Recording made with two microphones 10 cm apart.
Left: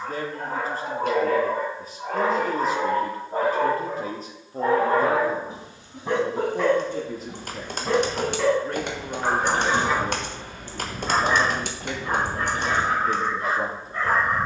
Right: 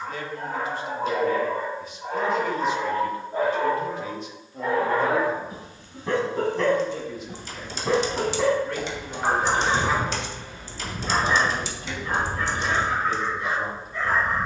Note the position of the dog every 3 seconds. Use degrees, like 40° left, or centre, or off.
60° left, 40° left, centre, 10° left, 40° left.